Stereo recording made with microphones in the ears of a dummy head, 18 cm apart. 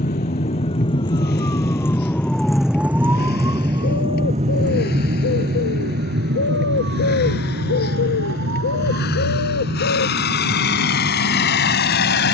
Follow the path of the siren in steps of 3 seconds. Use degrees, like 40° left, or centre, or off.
20° left, 30° right, 60° right, 70° right.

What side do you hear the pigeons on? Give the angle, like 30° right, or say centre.
70° left.